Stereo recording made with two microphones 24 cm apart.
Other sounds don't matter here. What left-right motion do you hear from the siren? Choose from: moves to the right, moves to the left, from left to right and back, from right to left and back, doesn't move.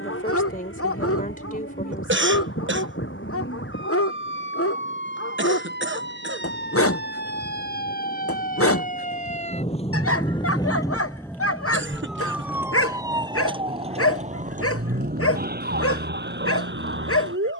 moves to the right.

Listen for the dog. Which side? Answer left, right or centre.
left.